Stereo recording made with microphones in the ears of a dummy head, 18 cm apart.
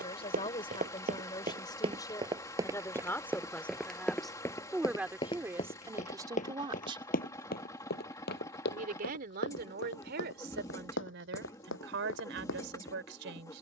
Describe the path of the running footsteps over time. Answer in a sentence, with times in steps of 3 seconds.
You can hear the running footsteps on the right from 0 s, in the centre from 3 s and on the left from 6 s.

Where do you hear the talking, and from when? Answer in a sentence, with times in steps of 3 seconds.
You can hear the talking on the left from 0 s, in the centre from 3 s and on the right from 6 s.